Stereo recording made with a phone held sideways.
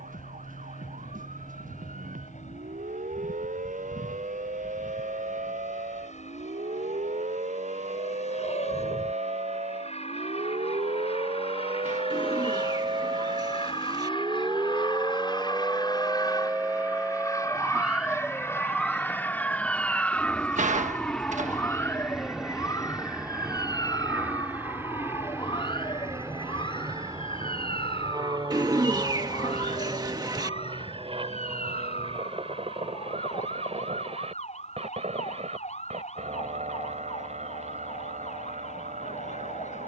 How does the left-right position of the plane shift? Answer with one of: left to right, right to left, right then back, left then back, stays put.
left to right.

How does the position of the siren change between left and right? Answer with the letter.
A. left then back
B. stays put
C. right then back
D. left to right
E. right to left
E.